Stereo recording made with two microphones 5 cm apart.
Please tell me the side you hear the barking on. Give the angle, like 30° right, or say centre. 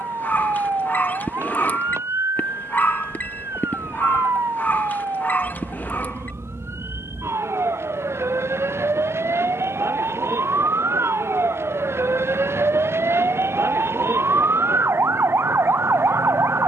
40° left.